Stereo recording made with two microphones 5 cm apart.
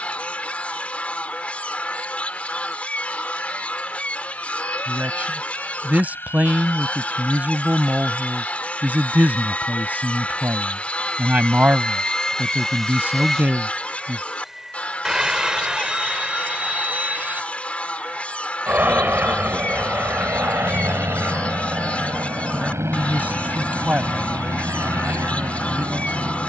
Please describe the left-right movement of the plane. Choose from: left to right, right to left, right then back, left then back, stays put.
left to right.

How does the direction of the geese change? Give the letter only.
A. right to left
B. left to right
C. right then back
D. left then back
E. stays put
E.